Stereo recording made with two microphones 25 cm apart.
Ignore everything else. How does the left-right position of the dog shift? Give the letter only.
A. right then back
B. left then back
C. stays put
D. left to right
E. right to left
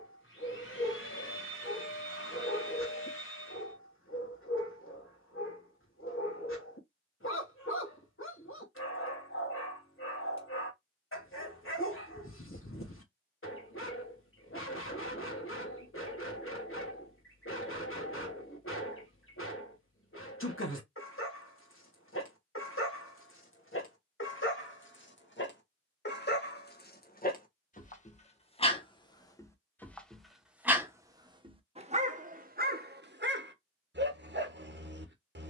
D.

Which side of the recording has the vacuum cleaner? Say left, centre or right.
left.